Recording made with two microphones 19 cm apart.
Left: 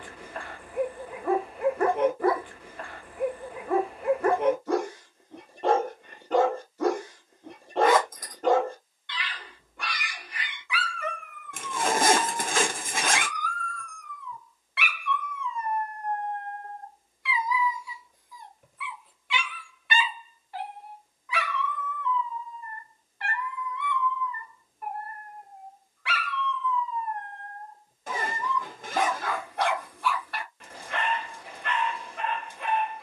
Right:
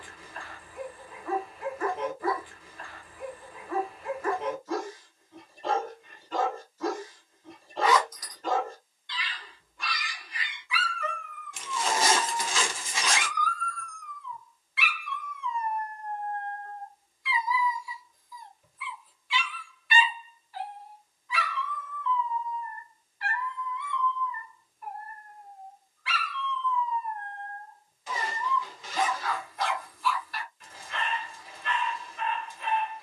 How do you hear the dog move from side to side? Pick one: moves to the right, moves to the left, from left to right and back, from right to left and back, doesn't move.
doesn't move.